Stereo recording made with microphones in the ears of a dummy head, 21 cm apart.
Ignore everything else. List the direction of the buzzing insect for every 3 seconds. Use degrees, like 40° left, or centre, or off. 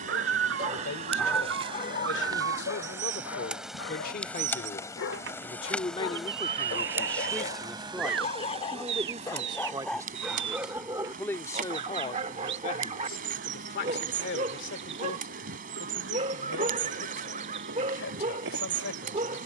30° right, centre, 20° right, 40° right, 40° right, 40° right, 40° right.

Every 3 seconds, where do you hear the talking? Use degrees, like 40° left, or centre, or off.
60° left, 40° left, centre, centre, 50° left, 70° left, 70° left.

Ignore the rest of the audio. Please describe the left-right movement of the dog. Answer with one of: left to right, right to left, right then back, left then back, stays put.
left then back.